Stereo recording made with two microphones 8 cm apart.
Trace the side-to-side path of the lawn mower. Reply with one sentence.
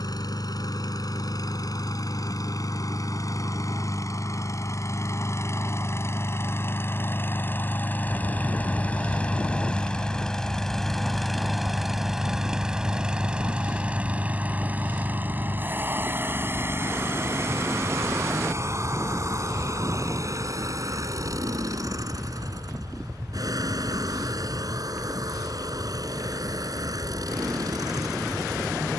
In this clip you hear the lawn mower move to the right.